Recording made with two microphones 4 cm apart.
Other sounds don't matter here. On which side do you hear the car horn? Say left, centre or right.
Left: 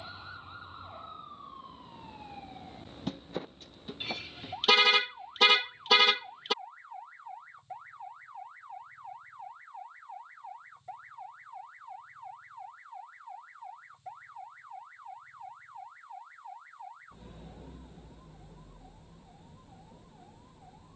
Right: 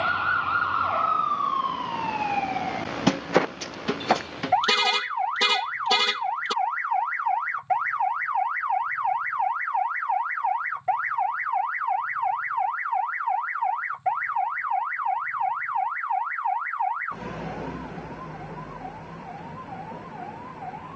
centre.